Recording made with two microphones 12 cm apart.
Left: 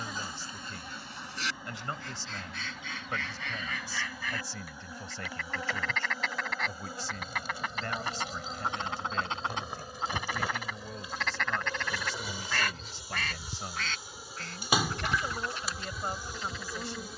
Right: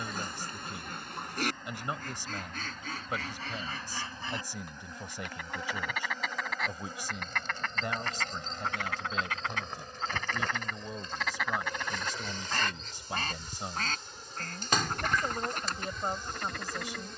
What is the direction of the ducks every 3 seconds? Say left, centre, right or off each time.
right, right, centre, centre, right, right.